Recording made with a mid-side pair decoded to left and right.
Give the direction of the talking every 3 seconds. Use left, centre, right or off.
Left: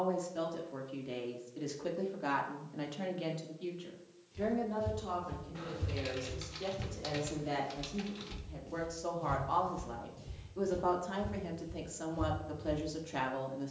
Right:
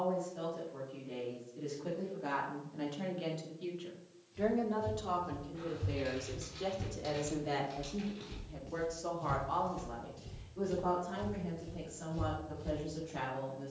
left, centre, centre, left, left.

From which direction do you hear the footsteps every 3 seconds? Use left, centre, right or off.
off, left, centre, right, right.